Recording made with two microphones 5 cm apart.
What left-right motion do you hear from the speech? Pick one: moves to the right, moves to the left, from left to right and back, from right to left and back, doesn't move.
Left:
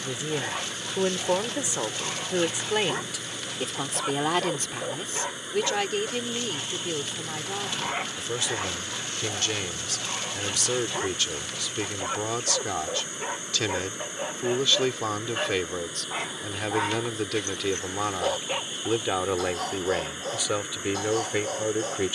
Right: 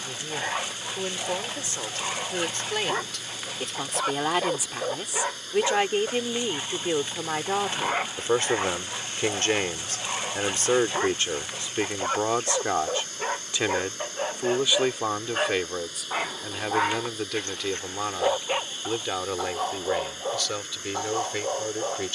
from left to right and back.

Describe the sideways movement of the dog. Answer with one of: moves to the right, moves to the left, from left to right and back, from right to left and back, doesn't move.
doesn't move.